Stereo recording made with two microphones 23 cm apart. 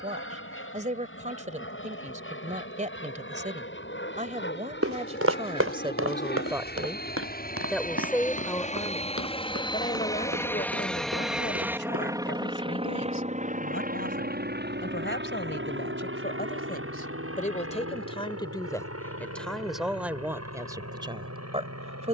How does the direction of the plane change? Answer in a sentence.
You can hear the plane move from left to right.